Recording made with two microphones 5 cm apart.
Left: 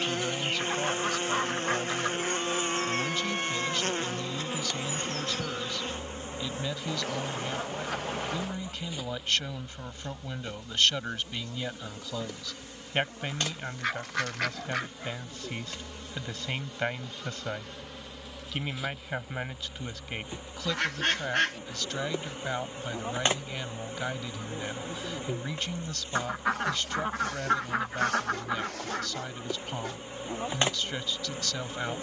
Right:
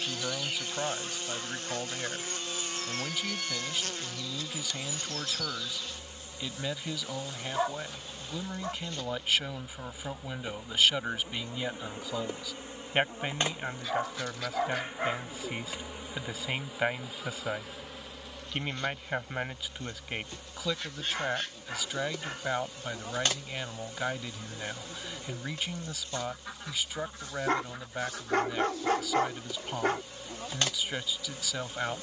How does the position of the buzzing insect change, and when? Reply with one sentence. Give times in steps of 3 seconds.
In this clip you hear the buzzing insect on the left from 0 s, in the centre from 9 s, on the right from 12 s, in the centre from 15 s and on the left from 21 s.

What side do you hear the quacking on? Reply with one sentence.
You can hear the quacking on the left.